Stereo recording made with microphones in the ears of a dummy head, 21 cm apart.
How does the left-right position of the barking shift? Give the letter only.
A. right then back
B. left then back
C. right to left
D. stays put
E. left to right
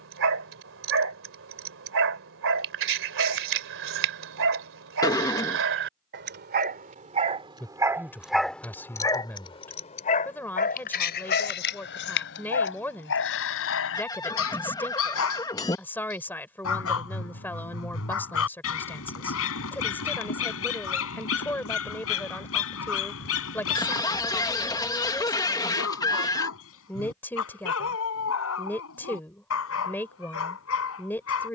C.